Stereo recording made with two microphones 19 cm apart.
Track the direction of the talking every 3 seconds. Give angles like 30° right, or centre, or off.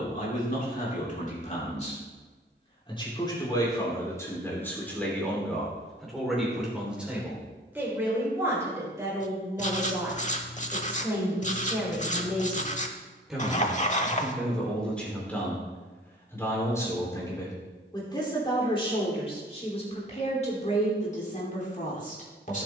40° left, 10° left, 10° right, 10° right, centre, 10° left, 30° left, 40° left.